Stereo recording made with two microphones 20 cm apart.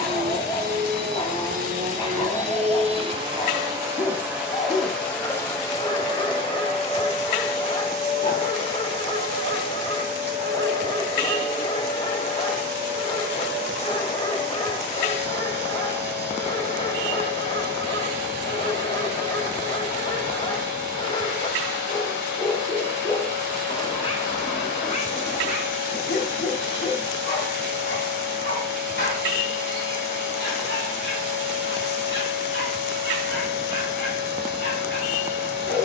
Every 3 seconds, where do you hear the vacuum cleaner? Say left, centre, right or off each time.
right, centre, left, left, left, left, left, left, left, left, left, left.